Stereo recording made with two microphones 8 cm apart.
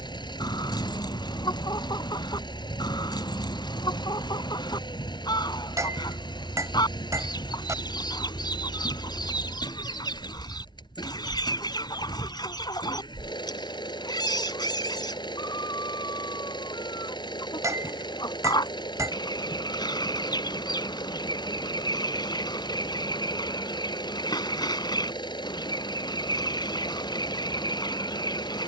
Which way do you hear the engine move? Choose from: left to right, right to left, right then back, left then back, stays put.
stays put.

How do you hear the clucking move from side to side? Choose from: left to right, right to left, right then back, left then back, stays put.
stays put.